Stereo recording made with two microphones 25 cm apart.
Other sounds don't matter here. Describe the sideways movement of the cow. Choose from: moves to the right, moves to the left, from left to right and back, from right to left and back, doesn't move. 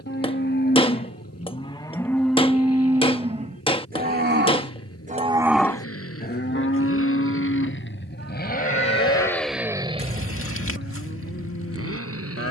from left to right and back.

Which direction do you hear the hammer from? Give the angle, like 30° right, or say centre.
20° left.